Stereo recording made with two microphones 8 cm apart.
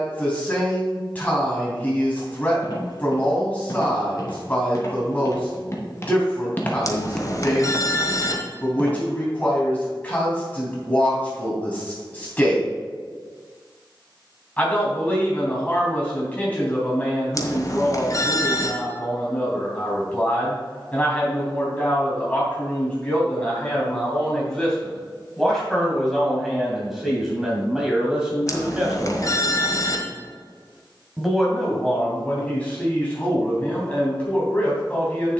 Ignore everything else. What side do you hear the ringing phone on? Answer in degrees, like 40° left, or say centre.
50° left.